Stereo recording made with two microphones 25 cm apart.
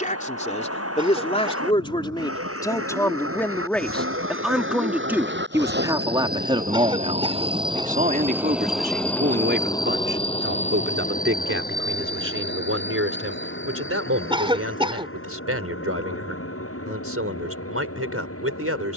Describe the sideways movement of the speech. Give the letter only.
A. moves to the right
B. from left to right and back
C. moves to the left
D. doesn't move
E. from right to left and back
A.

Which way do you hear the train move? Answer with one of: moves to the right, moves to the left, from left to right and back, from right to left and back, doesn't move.
moves to the left.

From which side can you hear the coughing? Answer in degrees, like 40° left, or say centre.
20° right.